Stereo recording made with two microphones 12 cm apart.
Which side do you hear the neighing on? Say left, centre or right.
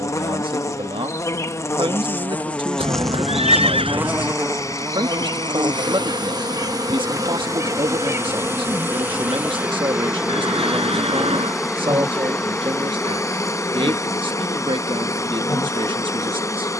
right.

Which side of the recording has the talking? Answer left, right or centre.
right.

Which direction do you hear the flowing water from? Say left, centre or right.
left.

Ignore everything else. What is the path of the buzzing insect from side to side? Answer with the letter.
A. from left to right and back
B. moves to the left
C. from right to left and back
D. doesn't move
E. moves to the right
A.